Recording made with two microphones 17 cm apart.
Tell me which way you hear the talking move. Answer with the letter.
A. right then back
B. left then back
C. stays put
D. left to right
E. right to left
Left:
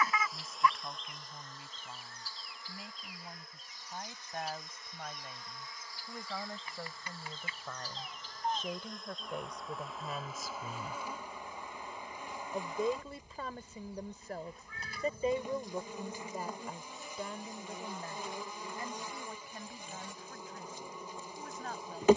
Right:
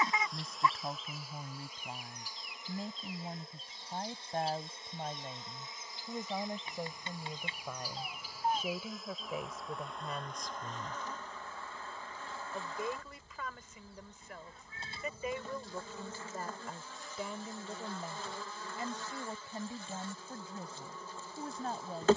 B.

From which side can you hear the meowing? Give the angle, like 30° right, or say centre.
30° right.